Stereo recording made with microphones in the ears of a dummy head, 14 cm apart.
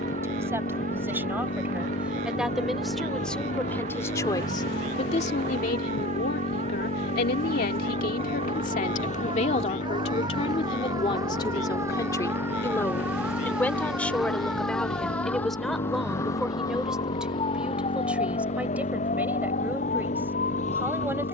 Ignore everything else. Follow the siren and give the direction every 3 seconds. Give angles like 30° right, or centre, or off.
50° right, 40° right, 40° right, 20° right, 10° right, 20° left, 50° left.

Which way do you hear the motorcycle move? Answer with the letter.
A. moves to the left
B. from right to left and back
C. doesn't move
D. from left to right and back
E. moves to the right
C.